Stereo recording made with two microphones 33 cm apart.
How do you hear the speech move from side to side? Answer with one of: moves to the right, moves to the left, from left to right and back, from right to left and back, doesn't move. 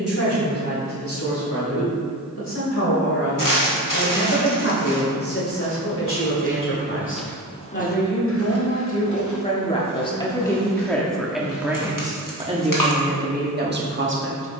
moves to the right.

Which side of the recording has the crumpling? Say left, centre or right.
left.